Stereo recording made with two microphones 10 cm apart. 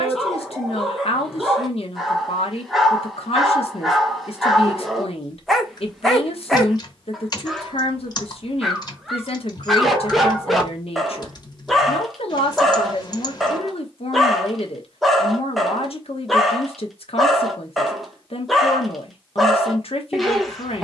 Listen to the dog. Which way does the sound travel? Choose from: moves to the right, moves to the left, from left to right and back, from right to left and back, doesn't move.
doesn't move.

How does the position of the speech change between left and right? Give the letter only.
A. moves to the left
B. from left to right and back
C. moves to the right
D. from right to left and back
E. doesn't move
E.